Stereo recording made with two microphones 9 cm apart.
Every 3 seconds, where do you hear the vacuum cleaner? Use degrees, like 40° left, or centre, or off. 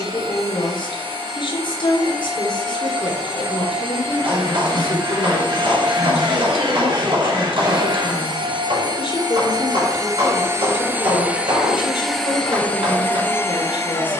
80° right, 80° right, 60° right, 30° right, 20° left.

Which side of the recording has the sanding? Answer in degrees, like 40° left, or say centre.
50° right.